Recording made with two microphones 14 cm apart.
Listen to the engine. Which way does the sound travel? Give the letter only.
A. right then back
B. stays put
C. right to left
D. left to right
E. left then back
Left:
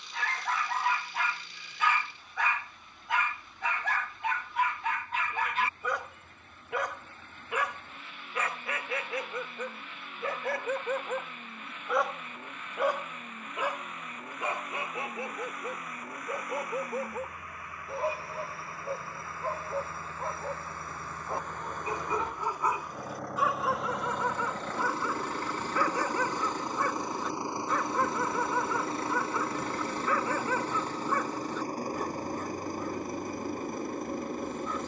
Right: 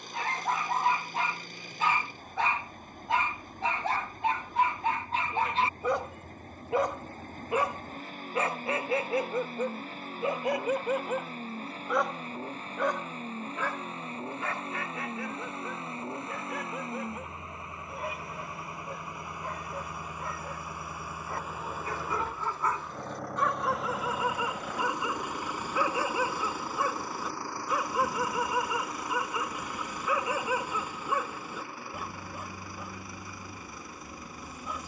C.